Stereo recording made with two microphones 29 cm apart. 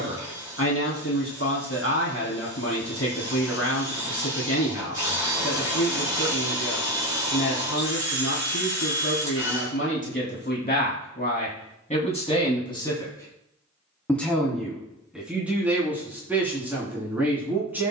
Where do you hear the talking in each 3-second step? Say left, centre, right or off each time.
left, left, left, left, centre, centre.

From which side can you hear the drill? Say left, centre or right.
centre.